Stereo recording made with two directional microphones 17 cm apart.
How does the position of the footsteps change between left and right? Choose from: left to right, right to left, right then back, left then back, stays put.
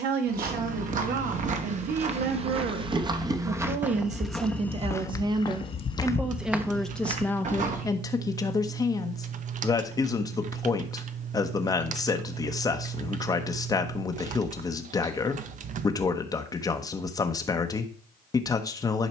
left then back.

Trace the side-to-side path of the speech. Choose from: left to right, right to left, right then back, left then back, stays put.
right to left.